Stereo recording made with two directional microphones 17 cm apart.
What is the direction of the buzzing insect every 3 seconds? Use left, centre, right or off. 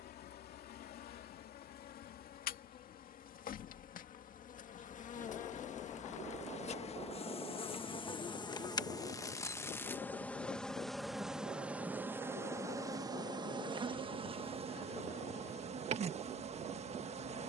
left, left, left, centre, right, right.